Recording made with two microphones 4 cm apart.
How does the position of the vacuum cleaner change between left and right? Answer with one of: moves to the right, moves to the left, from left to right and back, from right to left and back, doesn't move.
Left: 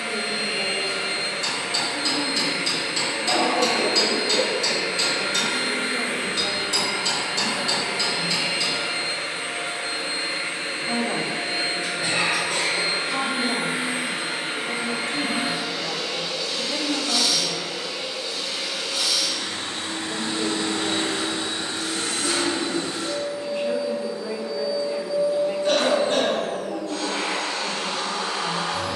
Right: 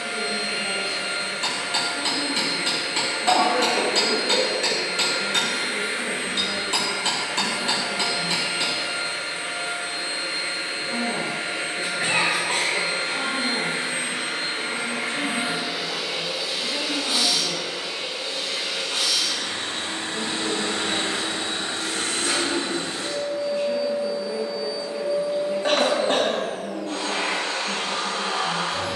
moves to the right.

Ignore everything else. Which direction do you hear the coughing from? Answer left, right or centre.
right.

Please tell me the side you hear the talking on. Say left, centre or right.
left.